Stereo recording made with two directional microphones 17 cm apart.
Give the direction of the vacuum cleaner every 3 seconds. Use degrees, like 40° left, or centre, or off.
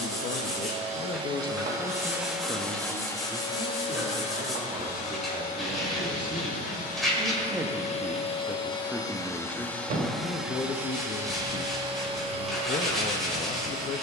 20° right, 40° left, 40° left, centre, 40° right.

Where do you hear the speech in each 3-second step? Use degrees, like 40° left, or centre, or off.
20° left, 30° right, 20° right, 20° left, 40° left.